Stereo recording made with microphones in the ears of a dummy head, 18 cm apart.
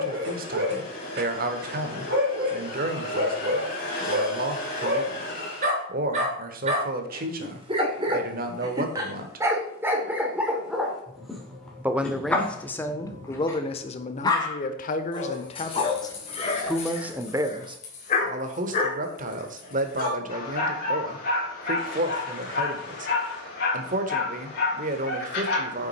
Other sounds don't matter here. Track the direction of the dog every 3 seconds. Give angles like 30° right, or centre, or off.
60° right, 50° right, 30° right, 10° right, 10° left, 30° left, 40° left, 50° left, 60° left.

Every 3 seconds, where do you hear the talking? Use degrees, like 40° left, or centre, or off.
50° right, 50° right, 50° right, 30° right, 20° left, 10° left, 40° right, 40° right, 40° right.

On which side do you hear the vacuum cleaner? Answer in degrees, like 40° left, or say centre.
50° left.